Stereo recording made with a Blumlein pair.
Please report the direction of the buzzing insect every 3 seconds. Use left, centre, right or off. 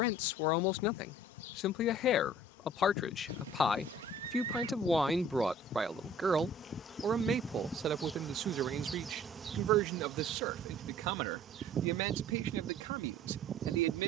left, left, centre, right, right.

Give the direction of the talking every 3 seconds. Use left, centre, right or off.
left, centre, right, right, right.